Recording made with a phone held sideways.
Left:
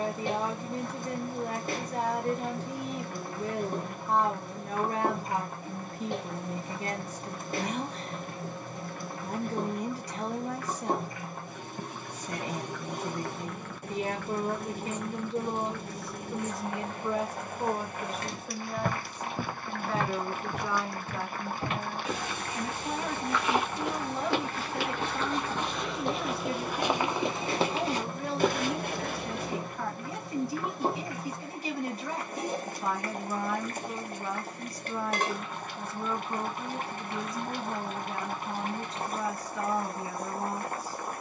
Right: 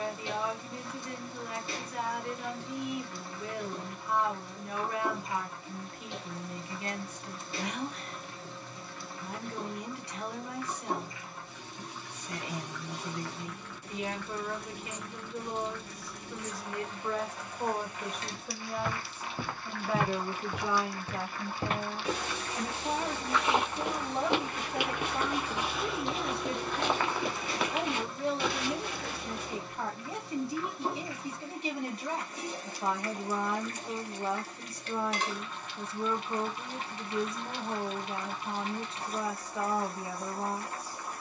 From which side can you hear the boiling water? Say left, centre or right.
left.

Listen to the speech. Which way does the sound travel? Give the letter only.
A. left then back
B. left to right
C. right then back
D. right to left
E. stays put
B.